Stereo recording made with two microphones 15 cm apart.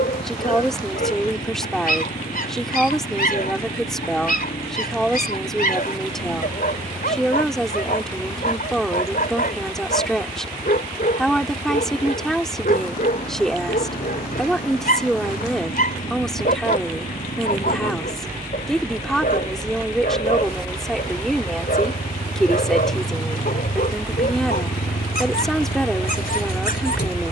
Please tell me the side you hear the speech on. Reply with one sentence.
You can hear the speech in the centre.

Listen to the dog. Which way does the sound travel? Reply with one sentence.
In this clip you hear the dog stay in one place.